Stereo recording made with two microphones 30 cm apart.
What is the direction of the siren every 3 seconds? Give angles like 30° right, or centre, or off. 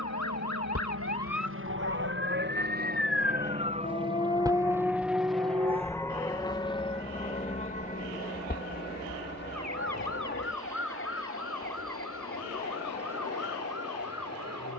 60° left, 10° left, 40° right, 60° right, 70° right.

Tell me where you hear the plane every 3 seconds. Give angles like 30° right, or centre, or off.
50° right, 10° right, 20° left, 40° left, 50° left.